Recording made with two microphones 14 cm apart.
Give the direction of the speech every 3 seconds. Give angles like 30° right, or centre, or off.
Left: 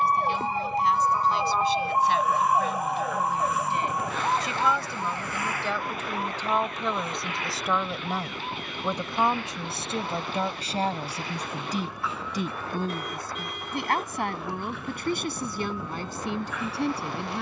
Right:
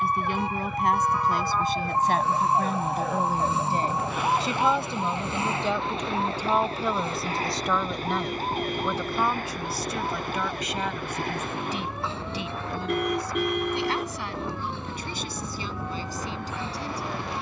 50° right, 30° right, centre, 30° left, 50° left, 60° left.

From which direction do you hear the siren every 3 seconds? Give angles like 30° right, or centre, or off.
20° left, 10° right, 30° right, 50° right, 50° right, 60° right.